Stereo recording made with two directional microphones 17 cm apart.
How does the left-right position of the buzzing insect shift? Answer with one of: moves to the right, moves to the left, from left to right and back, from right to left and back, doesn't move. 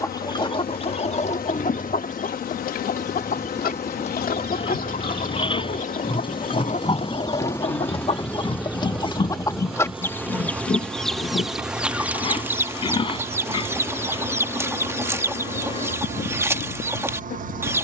from left to right and back.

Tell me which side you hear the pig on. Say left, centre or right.
left.